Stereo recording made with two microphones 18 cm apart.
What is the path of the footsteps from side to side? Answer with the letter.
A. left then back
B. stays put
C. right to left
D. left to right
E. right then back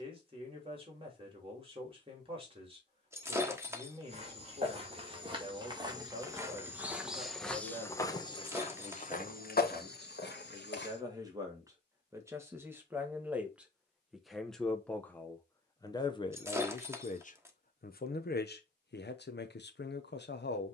C.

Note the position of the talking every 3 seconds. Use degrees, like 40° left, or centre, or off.
30° right, 30° right, 30° right, 20° right, 10° right, 30° left, 70° left.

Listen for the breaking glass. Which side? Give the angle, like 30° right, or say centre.
10° right.